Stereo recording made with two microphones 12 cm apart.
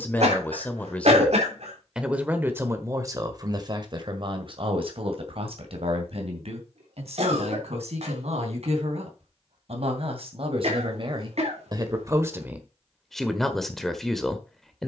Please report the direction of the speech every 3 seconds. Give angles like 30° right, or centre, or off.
centre, 50° right, 70° right, 60° right, 10° right.